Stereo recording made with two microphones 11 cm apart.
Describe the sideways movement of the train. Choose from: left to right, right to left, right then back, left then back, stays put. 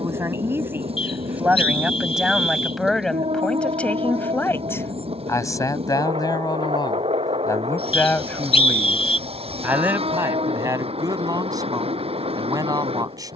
stays put.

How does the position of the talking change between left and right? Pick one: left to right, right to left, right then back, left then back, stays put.
left then back.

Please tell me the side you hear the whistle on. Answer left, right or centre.
left.